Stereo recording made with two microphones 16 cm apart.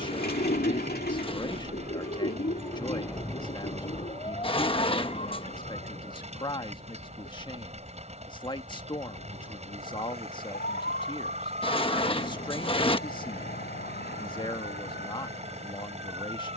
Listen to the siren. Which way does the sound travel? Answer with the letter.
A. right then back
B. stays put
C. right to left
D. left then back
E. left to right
C.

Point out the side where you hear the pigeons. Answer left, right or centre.
left.